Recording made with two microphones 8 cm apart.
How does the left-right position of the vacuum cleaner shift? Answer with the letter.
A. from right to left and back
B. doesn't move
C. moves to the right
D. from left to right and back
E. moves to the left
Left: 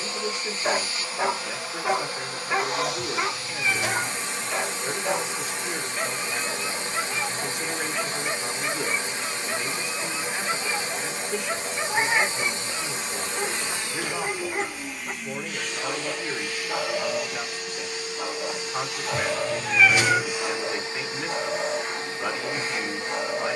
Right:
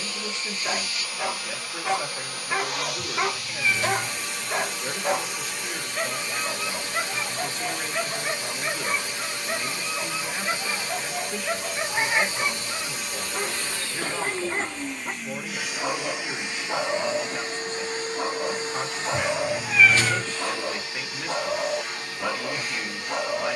D.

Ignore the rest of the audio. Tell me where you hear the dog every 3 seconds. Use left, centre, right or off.
left, right, right, right, right, right, right, right.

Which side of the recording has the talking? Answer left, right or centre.
centre.